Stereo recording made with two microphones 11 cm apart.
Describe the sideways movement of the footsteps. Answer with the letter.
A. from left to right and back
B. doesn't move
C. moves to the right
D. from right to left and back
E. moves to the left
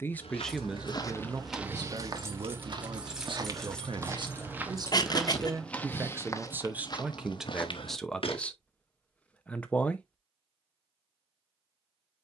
A.